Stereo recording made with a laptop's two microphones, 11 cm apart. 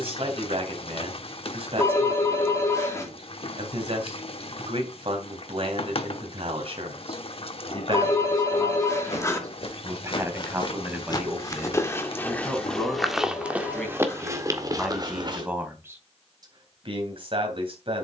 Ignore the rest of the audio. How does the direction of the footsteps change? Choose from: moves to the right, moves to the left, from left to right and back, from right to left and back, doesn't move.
moves to the right.